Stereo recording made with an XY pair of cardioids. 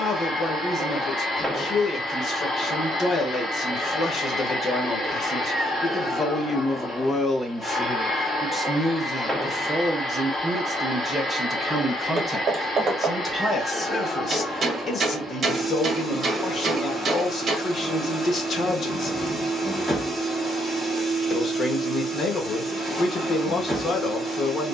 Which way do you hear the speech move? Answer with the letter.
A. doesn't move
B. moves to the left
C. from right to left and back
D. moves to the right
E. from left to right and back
E.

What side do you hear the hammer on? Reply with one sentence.
In this clip you hear the hammer on the right.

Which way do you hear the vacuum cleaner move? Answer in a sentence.
In this clip you hear the vacuum cleaner stay put.